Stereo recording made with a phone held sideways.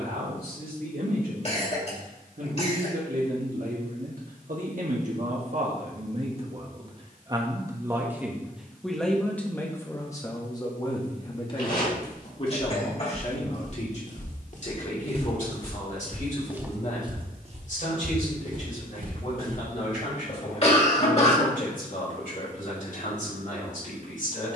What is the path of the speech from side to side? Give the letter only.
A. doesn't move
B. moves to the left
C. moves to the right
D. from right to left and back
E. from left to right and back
B.